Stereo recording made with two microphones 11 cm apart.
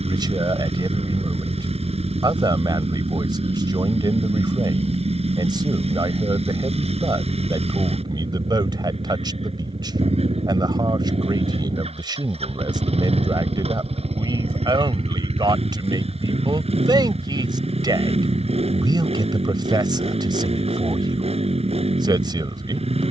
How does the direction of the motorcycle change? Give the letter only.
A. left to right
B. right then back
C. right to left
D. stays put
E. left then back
D.